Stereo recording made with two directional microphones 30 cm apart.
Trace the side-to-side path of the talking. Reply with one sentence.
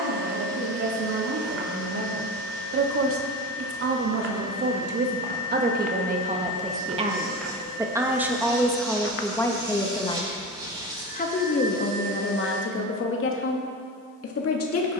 You can hear the talking travel towards the left.